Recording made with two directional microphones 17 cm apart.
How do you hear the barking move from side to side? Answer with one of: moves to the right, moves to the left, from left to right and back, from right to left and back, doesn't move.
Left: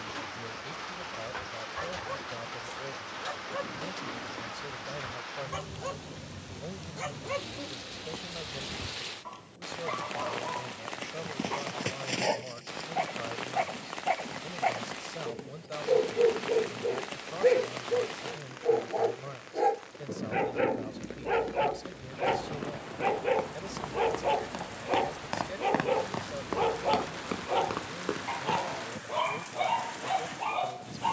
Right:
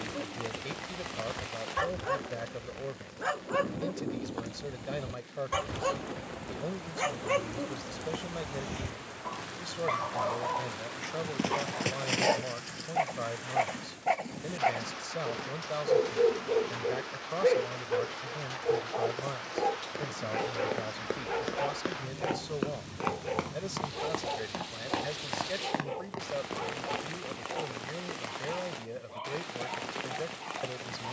moves to the left.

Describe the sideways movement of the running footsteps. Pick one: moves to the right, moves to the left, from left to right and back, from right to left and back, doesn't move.
moves to the left.